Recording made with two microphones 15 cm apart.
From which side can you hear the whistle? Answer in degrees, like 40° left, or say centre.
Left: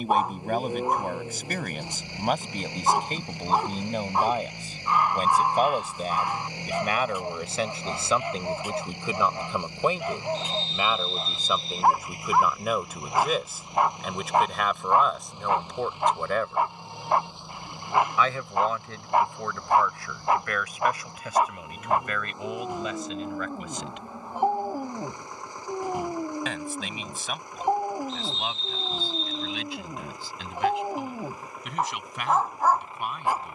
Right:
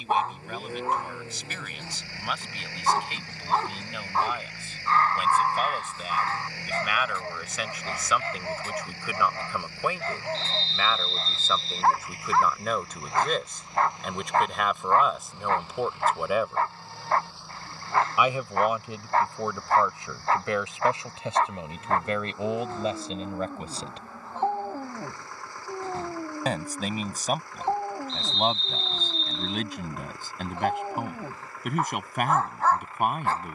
10° left.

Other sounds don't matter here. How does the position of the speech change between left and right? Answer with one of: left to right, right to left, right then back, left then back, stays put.
left to right.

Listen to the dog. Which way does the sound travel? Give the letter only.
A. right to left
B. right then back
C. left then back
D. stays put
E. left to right
D.